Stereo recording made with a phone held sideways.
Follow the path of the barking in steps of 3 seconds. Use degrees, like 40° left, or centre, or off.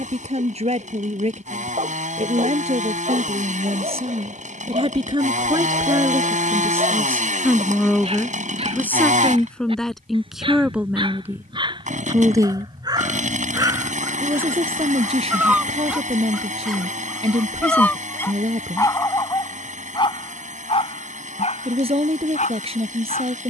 50° right, 50° right, 50° right, 40° right, 30° right, centre, 30° left, 60° left.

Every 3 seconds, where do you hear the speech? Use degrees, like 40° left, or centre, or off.
50° right, 40° right, 10° right, centre, 30° right, 40° right, 40° right, 40° right.